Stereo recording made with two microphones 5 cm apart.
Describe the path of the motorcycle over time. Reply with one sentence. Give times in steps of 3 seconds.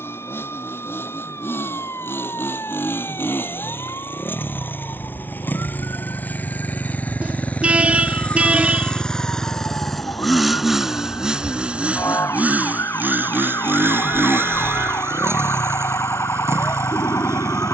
In this clip you hear the motorcycle on the left from 0 s, in the centre from 9 s and on the right from 12 s.